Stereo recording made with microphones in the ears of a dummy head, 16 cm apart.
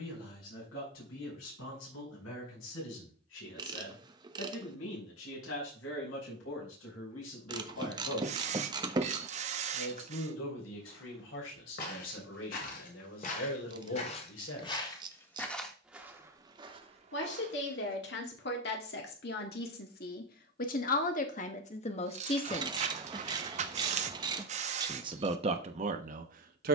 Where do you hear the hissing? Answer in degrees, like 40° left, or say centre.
40° right.